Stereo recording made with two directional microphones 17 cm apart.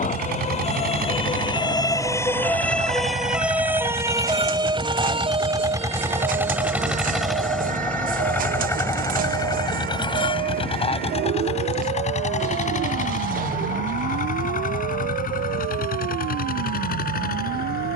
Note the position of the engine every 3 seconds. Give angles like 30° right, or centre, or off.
50° right, 30° right, centre, 30° left, 50° left, 60° left.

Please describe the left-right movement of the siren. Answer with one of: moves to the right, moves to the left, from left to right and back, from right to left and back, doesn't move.
moves to the right.